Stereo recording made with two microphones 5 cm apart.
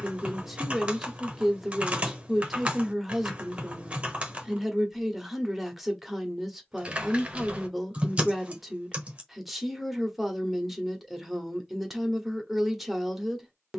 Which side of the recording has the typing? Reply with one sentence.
In this clip you hear the typing on the right.